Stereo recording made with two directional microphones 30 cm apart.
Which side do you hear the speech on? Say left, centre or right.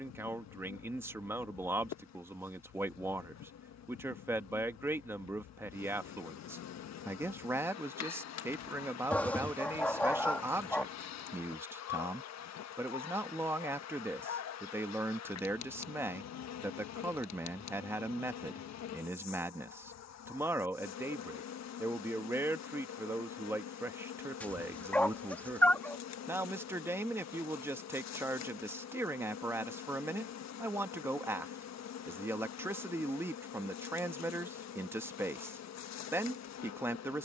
centre.